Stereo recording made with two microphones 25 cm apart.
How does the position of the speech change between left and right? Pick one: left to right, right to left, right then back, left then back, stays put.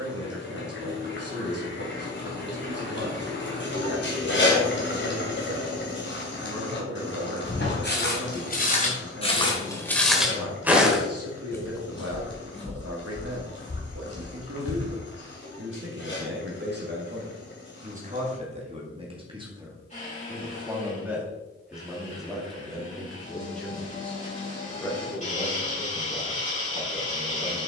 right to left.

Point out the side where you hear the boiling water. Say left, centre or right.
left.